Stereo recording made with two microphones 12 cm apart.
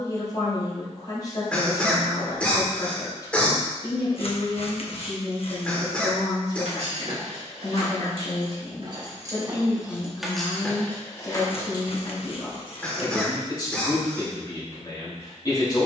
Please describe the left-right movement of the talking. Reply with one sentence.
You can hear the talking stay in one place.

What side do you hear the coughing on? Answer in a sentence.
In this clip you hear the coughing in the centre.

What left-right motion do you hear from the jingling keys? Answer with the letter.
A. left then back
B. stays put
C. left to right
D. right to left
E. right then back
D.